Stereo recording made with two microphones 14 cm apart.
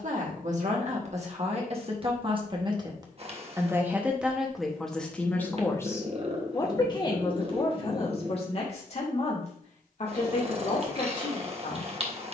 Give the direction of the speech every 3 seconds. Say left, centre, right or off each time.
right, centre, left, left.